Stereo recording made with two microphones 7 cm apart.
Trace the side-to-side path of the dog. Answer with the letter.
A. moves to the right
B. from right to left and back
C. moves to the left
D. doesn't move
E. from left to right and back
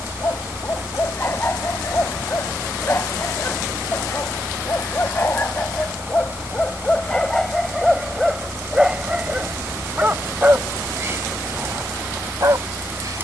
A.